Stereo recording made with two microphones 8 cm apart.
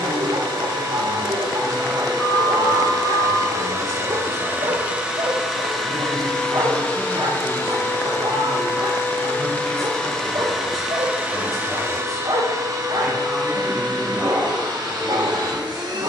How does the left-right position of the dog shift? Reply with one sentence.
You can hear the dog stay in one place.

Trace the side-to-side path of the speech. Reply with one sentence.
You can hear the speech stay in one place.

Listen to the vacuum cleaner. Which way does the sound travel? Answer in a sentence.
In this clip you hear the vacuum cleaner go left and come back.